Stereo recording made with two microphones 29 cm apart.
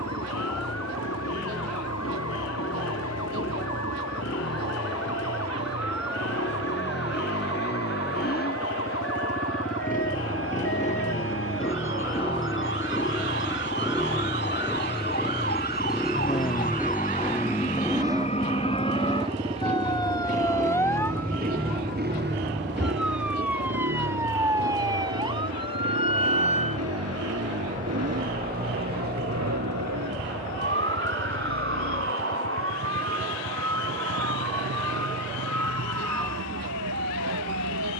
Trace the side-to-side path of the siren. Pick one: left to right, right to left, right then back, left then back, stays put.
left to right.